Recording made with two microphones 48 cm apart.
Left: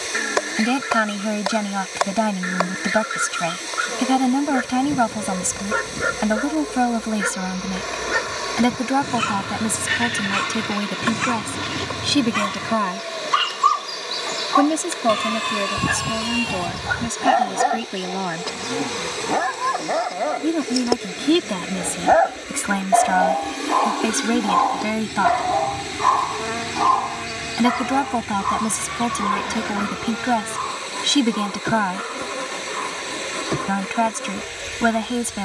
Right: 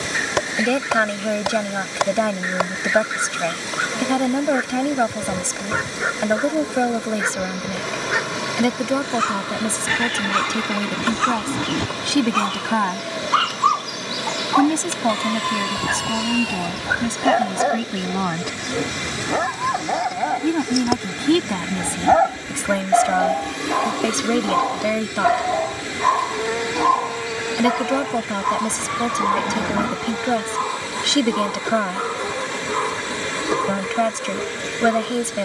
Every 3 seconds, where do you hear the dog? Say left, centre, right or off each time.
left, left, left, left, left, left, centre, right, right, right, right, right.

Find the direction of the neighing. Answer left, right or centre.
right.